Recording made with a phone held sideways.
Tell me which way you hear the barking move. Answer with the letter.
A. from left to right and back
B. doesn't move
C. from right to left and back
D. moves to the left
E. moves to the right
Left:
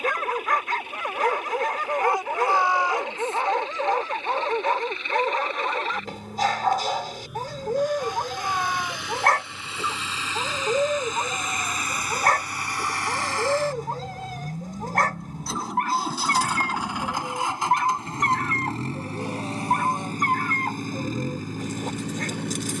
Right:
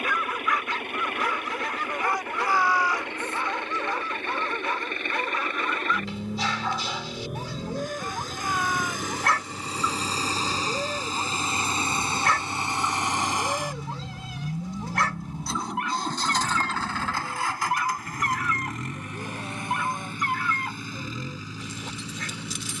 B.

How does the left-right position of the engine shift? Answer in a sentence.
You can hear the engine go from the right side to the left.